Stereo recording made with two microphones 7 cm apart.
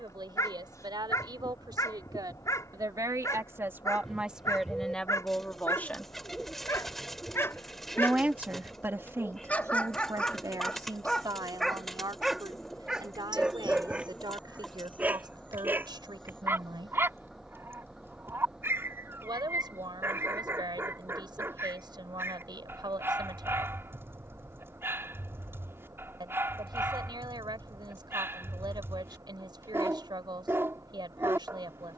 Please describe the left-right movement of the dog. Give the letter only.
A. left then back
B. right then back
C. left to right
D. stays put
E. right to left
C.